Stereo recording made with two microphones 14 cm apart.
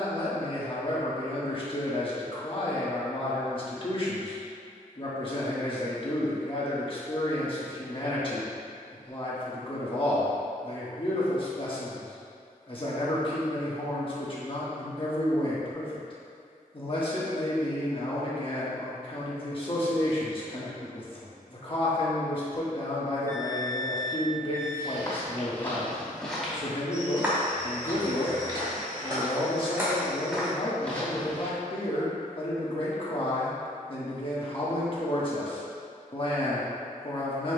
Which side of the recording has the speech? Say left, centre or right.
left.